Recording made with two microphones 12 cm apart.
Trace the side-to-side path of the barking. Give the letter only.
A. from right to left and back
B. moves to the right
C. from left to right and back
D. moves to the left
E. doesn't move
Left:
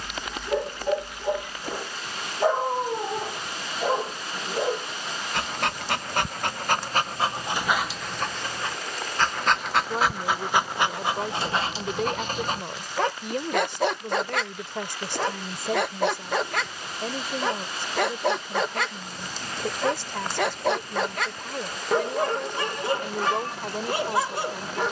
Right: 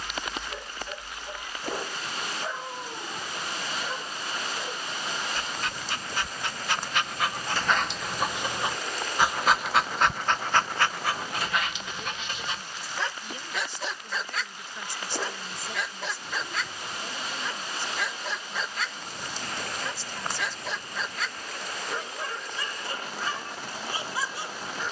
C.